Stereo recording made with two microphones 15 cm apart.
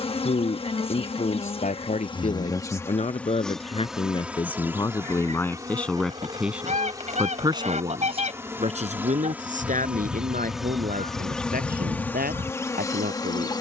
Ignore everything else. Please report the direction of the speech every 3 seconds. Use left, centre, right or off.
left, left, right, right, right.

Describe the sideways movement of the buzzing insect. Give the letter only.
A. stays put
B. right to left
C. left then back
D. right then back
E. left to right
D.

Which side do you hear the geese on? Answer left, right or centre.
right.